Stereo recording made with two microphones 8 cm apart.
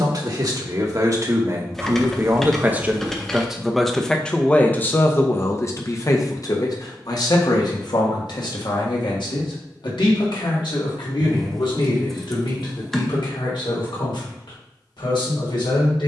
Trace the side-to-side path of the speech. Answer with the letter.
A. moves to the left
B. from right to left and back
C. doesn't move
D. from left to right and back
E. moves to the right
A.